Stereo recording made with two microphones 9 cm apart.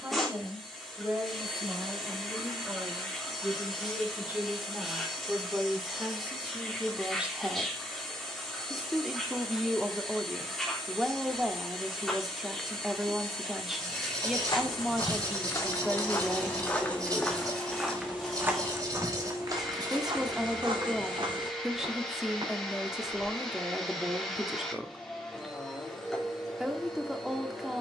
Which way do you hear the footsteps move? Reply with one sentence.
In this clip you hear the footsteps travel towards the right.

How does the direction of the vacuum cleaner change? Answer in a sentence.
In this clip you hear the vacuum cleaner stay put.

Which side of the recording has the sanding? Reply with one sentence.
You can hear the sanding on the right.